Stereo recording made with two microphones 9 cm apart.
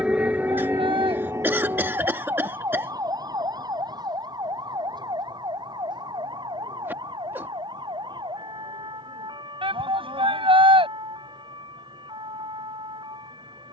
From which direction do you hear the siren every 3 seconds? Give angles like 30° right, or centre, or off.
30° right, 40° right, 50° right, 50° right, 50° right.